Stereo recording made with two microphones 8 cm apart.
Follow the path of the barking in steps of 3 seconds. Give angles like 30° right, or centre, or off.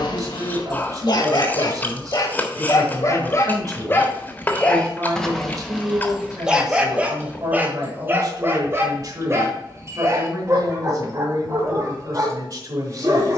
50° left, 20° left, 20° right, 40° right, 50° right.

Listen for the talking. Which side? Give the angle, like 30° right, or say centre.
50° right.